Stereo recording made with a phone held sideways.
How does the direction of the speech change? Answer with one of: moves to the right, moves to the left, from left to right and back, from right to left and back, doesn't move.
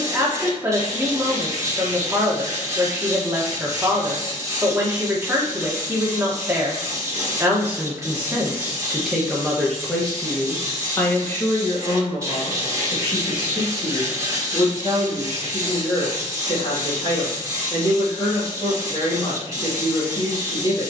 moves to the left.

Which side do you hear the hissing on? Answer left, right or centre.
right.